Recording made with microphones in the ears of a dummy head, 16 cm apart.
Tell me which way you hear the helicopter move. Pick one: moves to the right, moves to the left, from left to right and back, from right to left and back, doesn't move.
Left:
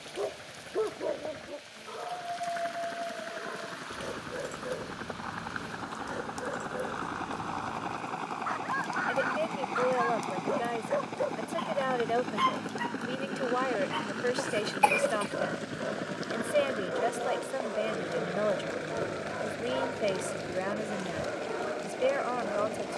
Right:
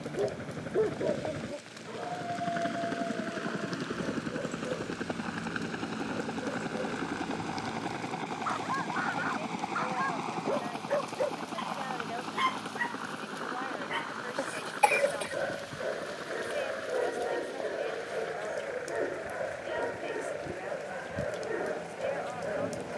moves to the left.